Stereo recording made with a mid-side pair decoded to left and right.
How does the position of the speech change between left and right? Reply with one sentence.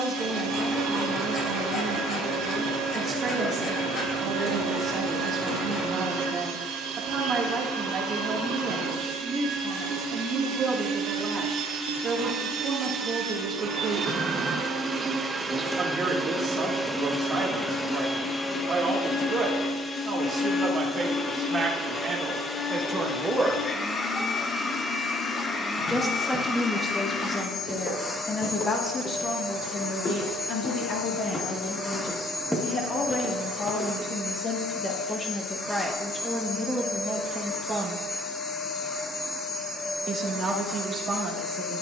You can hear the speech go left and come back.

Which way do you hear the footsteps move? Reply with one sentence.
You can hear the footsteps move to the right.